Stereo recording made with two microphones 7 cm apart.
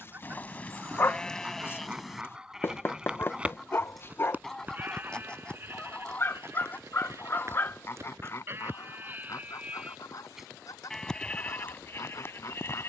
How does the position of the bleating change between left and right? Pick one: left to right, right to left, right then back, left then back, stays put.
right then back.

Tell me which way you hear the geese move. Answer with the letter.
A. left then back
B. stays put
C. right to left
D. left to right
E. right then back
C.